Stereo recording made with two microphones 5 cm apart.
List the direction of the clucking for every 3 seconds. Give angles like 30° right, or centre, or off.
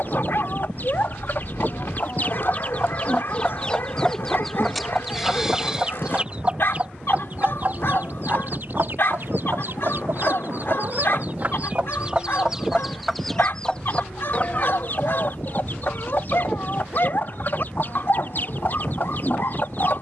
40° left, centre, 40° right, 50° right, 10° left, 50° left, 50° left.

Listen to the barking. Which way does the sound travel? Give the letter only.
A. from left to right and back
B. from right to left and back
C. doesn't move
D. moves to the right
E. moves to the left
C.